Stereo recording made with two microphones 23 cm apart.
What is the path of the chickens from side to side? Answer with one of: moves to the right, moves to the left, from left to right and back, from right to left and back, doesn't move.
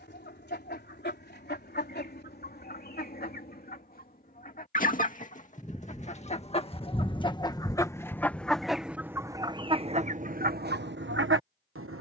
moves to the right.